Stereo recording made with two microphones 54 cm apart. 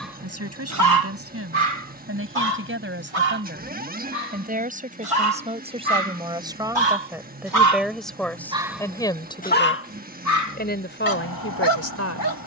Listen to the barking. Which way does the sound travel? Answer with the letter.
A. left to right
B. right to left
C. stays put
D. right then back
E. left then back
D.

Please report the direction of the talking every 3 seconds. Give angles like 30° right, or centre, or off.
20° right, 10° right, centre, 20° left.